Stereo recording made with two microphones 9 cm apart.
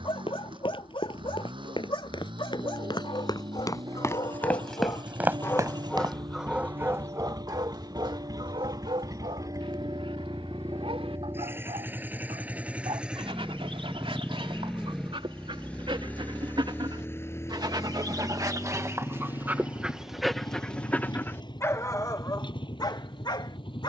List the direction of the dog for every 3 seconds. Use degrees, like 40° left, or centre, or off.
60° left, 50° left, 40° right, 70° right, 70° right, 60° right, 10° right, 40° left.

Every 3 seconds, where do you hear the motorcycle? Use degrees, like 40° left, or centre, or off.
60° right, 50° right, 50° right, 30° right, 10° right, 20° left, 40° left, 50° left.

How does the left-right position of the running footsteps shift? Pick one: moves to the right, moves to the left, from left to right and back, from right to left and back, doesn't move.
moves to the right.